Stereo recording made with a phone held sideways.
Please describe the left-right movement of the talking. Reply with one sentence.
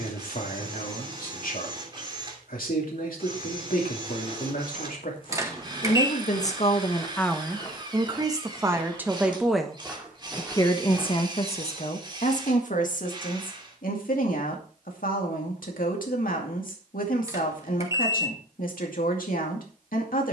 In this clip you hear the talking move from left to right and back again.